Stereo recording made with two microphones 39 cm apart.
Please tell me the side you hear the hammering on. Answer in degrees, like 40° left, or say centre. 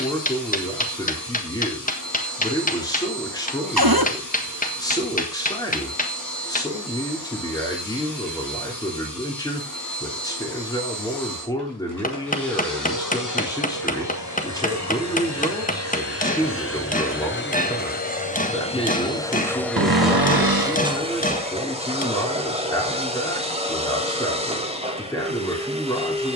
20° left.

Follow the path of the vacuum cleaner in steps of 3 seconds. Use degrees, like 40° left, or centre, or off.
50° left, 50° left, 50° left, 50° left, 50° left, 30° left, 10° left, 20° right, 20° right.